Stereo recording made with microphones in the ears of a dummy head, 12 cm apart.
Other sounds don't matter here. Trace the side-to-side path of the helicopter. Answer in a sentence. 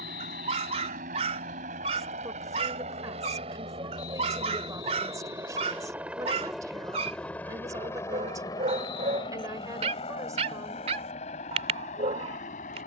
In this clip you hear the helicopter go from the right side to the left.